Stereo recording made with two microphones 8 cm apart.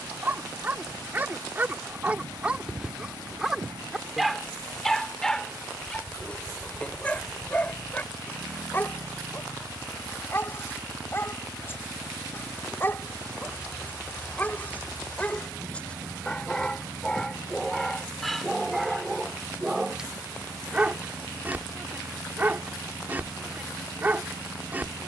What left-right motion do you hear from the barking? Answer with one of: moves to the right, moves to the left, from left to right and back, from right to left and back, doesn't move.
from right to left and back.